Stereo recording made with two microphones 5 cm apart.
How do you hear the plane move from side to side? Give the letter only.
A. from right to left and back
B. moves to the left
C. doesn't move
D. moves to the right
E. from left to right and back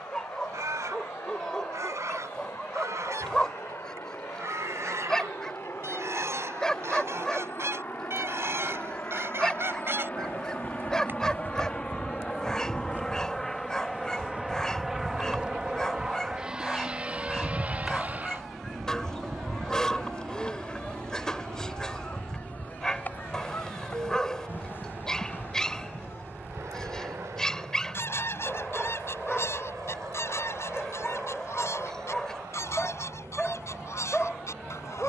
D.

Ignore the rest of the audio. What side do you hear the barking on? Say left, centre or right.
centre.